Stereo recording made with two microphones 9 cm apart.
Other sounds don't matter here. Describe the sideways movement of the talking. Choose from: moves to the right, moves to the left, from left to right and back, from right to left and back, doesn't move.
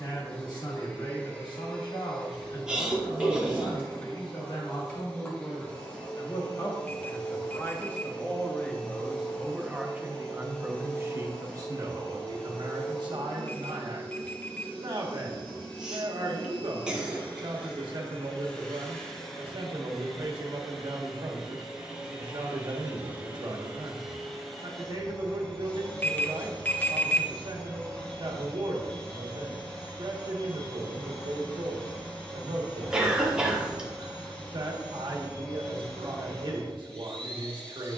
moves to the right.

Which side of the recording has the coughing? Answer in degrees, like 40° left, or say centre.
10° right.